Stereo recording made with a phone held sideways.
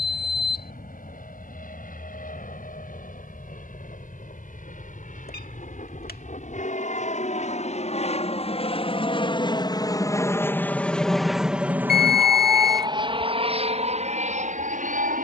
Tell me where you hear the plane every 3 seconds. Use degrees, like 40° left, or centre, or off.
70° left, 70° left, 50° left, 10° left, 30° right.